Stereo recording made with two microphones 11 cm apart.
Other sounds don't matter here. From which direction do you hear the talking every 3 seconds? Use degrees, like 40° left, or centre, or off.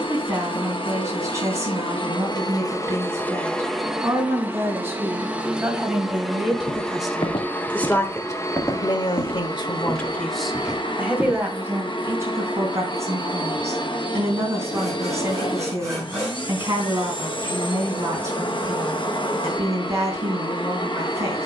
30° right, 20° right, 10° left, 10° left, 30° right, 30° right, 30° right.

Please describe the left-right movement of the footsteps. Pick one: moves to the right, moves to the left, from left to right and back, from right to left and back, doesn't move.
moves to the right.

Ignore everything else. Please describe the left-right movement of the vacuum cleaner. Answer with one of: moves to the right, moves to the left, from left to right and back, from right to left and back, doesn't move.
from left to right and back.